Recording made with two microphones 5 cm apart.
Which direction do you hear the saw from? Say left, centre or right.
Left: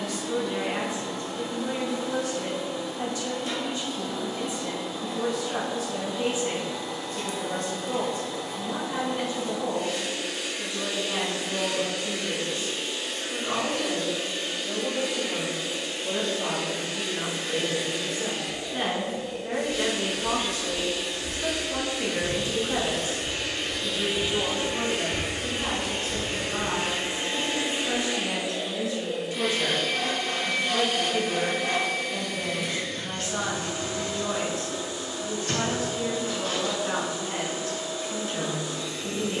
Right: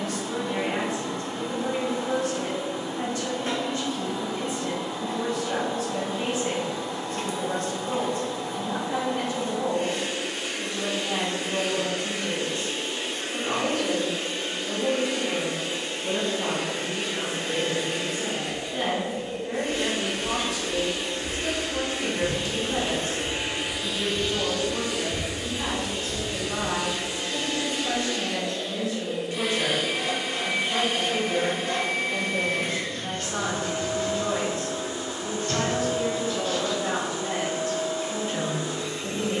left.